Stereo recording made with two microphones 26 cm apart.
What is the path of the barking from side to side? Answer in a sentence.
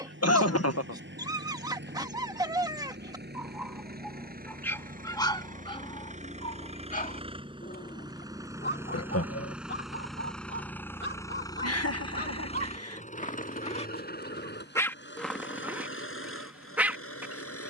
In this clip you hear the barking move from right to left and back again.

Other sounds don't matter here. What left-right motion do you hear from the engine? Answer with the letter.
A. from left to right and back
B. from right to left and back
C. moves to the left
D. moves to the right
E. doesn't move
C.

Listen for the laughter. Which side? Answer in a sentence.
In this clip you hear the laughter on the left.